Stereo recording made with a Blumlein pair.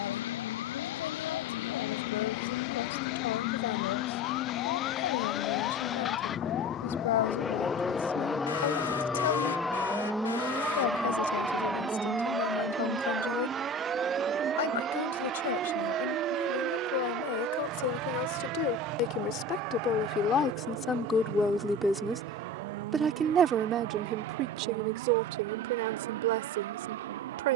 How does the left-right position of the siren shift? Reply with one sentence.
In this clip you hear the siren go from the left side to the right.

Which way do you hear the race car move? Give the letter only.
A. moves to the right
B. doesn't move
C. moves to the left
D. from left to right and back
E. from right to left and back
A.